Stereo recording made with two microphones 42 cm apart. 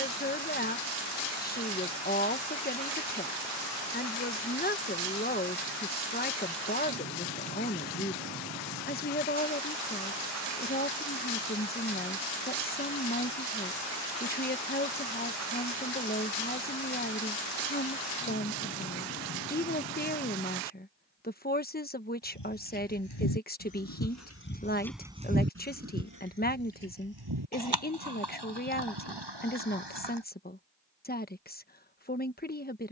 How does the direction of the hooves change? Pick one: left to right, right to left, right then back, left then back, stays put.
left to right.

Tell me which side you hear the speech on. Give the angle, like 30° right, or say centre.
20° left.